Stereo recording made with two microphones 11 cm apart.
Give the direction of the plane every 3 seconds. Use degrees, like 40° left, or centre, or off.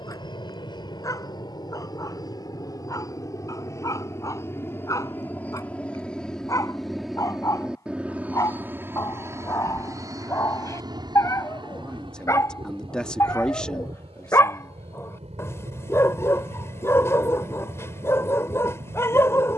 40° left, 20° left, centre, 30° right, 50° right, 60° right, 70° right.